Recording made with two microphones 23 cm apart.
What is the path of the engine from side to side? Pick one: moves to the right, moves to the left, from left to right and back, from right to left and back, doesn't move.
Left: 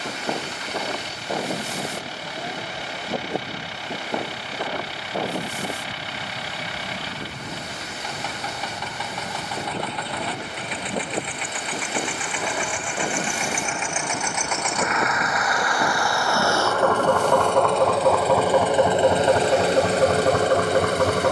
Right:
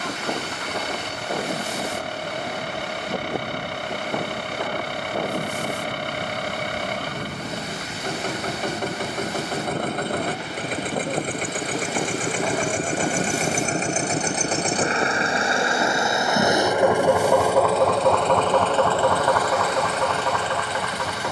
moves to the left.